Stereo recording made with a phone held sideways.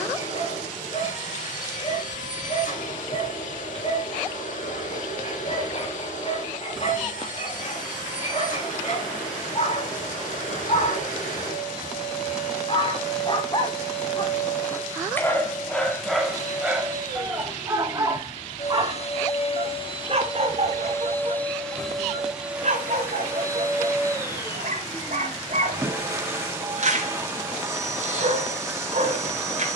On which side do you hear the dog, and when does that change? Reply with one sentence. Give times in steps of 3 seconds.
In this clip you hear the dog on the left from 0 s, in the centre from 15 s and on the right from 18 s.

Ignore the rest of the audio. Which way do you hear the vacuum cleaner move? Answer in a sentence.
In this clip you hear the vacuum cleaner go from the left side to the right.